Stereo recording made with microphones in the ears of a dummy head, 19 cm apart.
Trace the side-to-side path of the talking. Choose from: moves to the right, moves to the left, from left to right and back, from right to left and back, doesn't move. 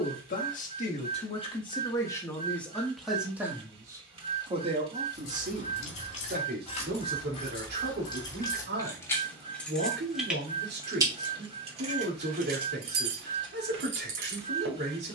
moves to the right.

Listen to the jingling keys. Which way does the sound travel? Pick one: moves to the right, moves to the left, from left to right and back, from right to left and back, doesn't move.
moves to the right.